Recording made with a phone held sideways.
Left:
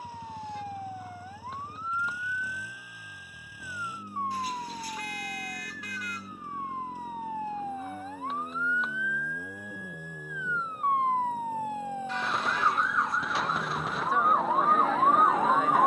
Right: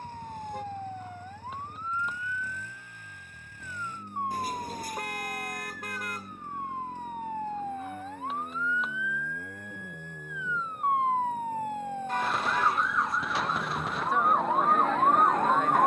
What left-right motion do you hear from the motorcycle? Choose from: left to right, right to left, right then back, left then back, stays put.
stays put.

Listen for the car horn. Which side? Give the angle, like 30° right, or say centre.
40° right.